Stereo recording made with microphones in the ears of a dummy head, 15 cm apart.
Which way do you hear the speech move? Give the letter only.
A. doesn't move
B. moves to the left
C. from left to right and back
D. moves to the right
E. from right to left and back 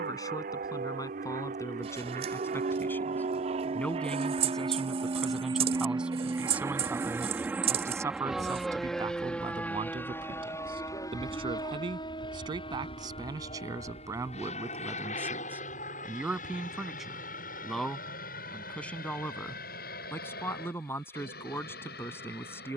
C.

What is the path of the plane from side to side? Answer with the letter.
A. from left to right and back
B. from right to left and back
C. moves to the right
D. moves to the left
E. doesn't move
D.